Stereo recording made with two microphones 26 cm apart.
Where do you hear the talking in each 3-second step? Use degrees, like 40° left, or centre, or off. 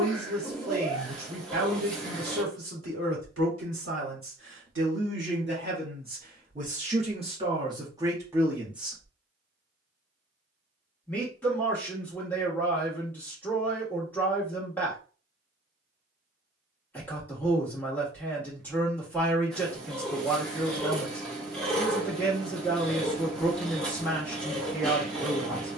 70° right, 50° right, 20° right, 10° left, 10° left, 10° left, 10° left, 10° left, 10° left.